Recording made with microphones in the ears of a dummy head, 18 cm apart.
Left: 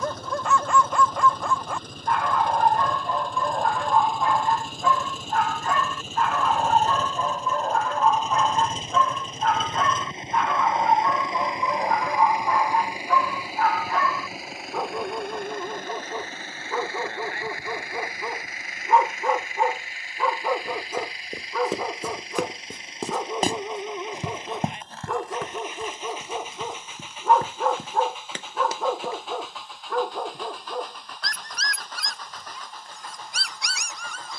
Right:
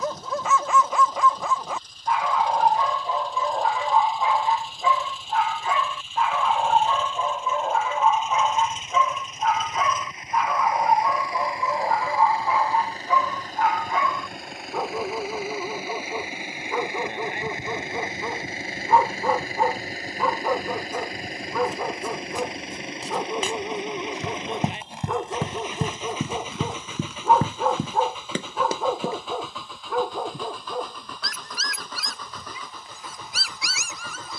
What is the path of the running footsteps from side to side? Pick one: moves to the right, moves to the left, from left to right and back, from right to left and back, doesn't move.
moves to the right.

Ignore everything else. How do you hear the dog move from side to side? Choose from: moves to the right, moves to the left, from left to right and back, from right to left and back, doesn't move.
doesn't move.